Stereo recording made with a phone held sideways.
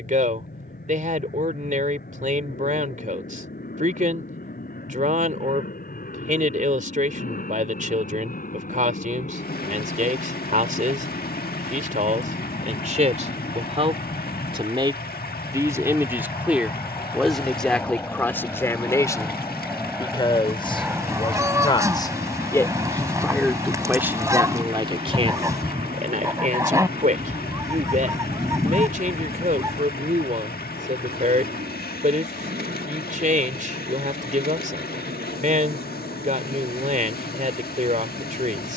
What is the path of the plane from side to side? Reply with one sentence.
You can hear the plane move to the right.